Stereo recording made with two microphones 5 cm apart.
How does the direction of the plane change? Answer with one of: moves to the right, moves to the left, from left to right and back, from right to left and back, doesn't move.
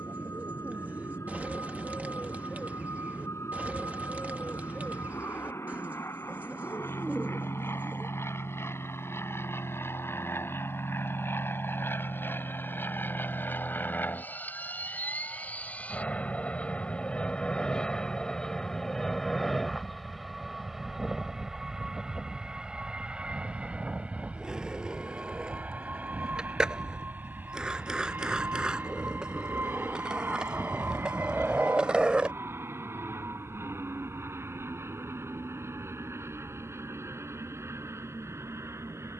moves to the right.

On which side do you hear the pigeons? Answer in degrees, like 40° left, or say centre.
30° right.